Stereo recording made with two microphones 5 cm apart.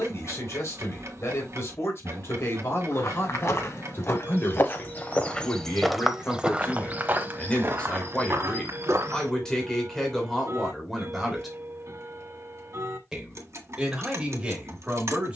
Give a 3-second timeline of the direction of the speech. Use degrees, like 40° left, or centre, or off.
50° left, 40° left, 20° left, 10° left, 20° right.